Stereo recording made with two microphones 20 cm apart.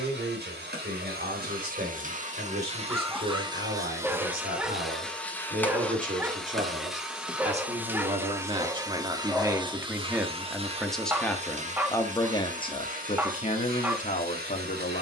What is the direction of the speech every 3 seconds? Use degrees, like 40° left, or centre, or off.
50° right, 50° right, 30° right, centre, 30° left.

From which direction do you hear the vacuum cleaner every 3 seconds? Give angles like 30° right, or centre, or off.
50° right, 10° right, 10° right, 30° right, 50° right.